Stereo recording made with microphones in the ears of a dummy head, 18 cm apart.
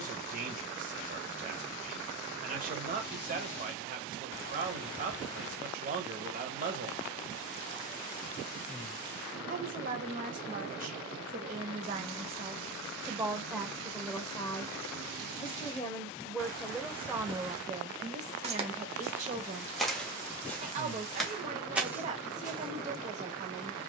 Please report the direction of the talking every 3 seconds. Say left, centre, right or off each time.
right, right, right, right, centre, centre, right, right.